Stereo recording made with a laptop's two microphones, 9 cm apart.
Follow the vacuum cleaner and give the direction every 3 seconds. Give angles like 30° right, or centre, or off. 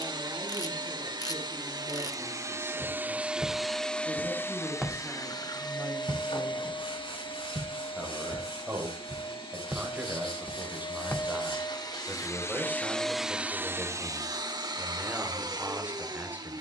40° right, 20° left, 60° left, 60° left, 10° right, 50° right.